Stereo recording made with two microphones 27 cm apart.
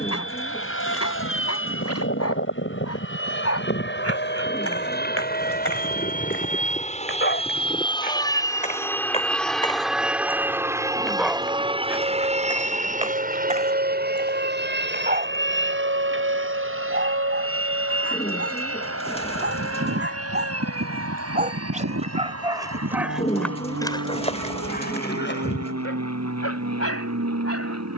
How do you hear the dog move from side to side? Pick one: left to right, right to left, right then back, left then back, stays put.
right then back.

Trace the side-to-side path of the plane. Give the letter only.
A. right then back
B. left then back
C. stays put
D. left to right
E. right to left
D.